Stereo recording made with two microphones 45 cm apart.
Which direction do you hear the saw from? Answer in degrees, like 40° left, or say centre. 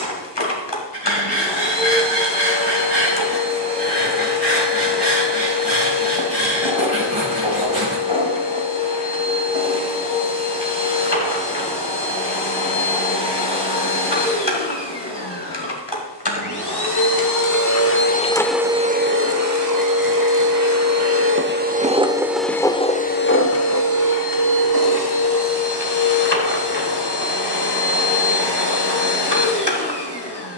60° right.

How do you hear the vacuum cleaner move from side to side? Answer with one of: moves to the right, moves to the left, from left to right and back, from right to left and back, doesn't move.
from left to right and back.